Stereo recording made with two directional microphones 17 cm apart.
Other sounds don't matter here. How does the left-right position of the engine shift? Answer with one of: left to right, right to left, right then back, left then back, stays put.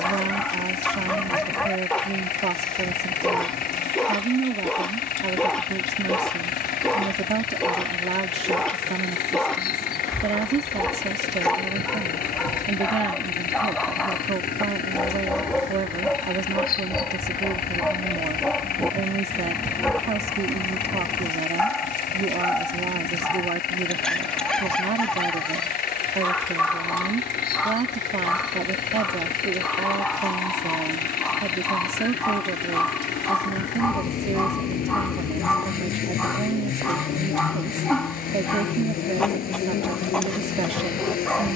stays put.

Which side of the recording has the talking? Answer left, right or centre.
right.